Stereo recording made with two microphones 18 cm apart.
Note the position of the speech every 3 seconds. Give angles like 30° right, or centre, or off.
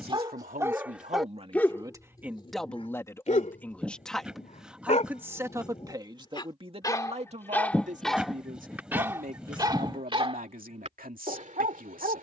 30° right, centre, 40° right, 50° right.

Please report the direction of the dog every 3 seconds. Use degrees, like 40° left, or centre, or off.
10° left, 40° left, 10° left, 30° right.